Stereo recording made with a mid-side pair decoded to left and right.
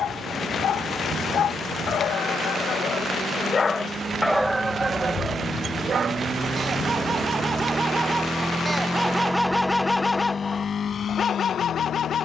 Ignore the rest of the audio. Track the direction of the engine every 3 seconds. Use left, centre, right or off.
right, right, right, left.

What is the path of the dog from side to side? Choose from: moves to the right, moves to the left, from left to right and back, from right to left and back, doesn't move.
from left to right and back.